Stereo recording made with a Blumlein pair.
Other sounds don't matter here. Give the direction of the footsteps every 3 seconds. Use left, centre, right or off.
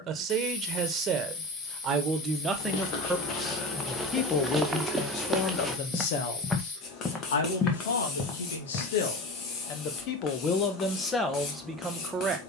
left, centre, left, off.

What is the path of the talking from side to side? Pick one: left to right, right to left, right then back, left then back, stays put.
left then back.